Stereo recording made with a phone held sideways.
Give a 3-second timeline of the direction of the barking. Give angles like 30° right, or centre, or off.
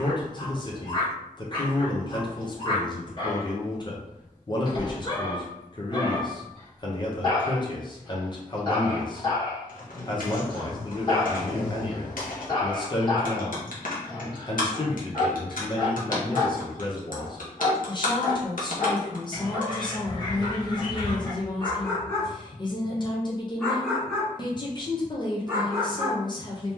30° left, 30° left, 30° left, 30° left, 30° left, 30° left, 30° left, 20° left, 10° right.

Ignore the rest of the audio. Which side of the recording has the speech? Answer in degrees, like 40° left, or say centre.
30° left.